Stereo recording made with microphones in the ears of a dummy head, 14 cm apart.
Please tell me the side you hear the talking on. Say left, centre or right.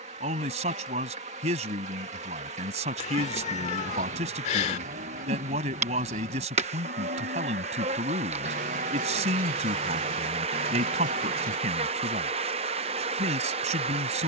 right.